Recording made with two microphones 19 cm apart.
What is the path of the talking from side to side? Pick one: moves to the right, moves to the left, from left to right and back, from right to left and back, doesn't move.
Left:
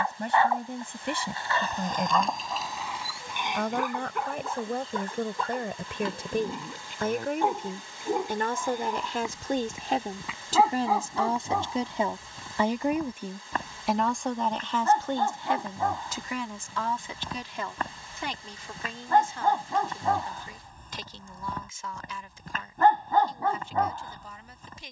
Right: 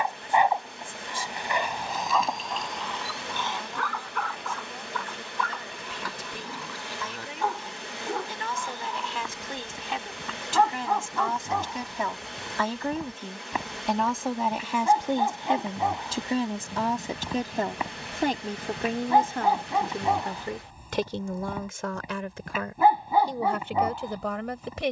moves to the right.